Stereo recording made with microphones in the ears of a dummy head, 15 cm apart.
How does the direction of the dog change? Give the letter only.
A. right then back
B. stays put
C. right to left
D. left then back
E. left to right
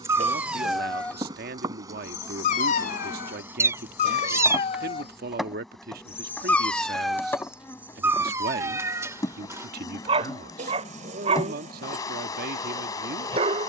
D.